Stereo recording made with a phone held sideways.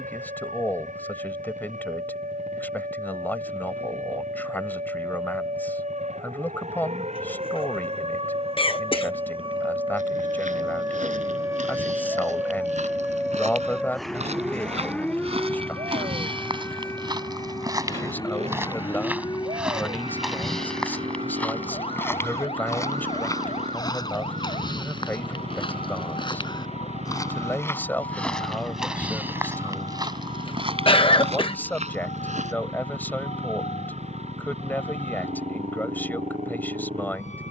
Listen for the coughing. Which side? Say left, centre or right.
left.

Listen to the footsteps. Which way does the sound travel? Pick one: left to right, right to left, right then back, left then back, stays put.
left then back.